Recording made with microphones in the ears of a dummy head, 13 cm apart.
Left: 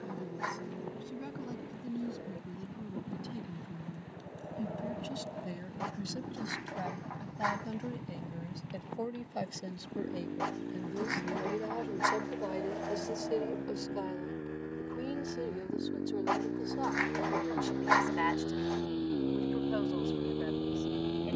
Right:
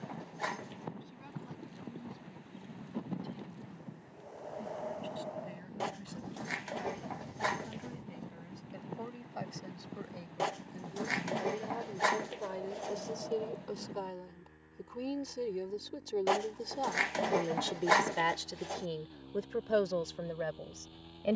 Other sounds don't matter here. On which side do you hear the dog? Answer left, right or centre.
right.